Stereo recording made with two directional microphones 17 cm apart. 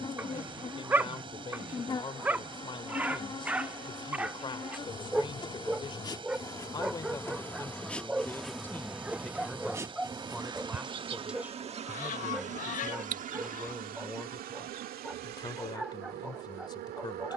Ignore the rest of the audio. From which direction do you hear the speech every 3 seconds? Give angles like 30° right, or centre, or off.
30° left, 30° left, 20° left, centre, centre, 30° left.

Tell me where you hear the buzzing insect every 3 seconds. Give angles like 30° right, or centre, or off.
30° left, 30° left, 10° left, 20° right, 50° right, 70° right.